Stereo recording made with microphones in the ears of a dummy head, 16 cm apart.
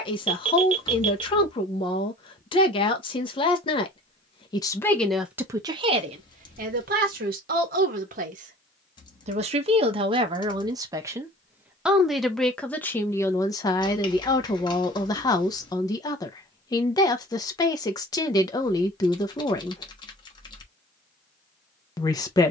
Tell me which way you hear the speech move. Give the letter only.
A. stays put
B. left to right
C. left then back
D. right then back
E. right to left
D.